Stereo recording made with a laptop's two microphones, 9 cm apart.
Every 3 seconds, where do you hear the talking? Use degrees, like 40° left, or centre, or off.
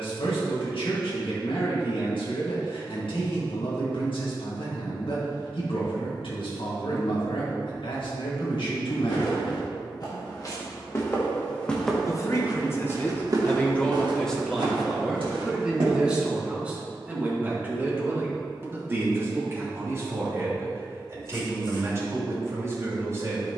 80° left, 80° left, 80° left, 70° left, 20° left, 10° right, 30° right, 30° right.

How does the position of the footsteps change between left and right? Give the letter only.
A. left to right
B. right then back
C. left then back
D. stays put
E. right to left
A.